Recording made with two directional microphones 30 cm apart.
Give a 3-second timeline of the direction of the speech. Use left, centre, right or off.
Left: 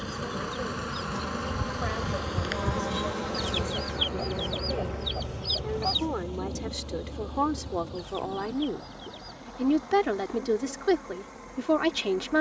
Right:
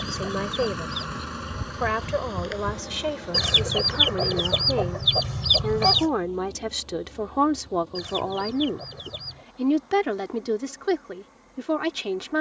right, right, right, centre.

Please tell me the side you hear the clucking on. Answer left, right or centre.
right.